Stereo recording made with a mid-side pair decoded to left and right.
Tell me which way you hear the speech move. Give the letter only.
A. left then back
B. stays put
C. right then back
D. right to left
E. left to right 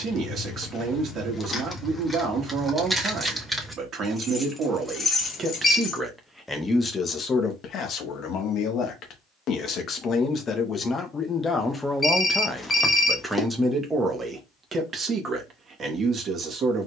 A.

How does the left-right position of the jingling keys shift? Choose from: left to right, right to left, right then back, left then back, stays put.
right then back.